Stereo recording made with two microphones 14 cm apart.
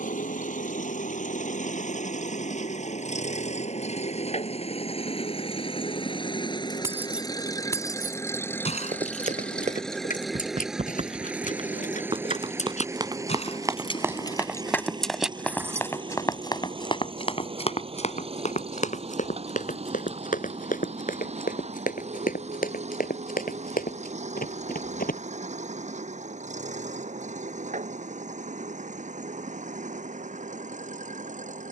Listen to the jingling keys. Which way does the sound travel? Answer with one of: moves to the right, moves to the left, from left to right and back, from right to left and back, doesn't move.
from right to left and back.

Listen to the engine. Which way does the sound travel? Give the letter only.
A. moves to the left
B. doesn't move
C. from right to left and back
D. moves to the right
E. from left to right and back
D.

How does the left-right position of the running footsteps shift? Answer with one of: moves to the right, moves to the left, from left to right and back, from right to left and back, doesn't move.
moves to the left.